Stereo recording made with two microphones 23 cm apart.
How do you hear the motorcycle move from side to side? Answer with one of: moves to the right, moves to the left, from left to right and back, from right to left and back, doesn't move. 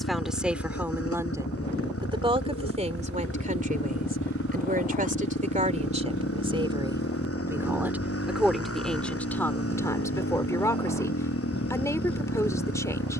doesn't move.